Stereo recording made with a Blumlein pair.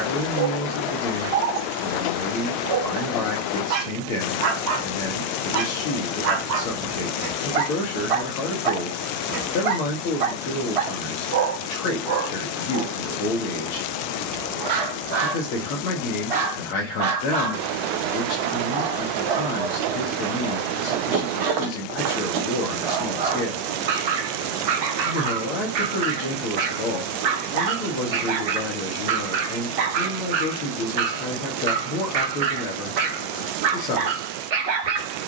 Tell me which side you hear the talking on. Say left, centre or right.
left.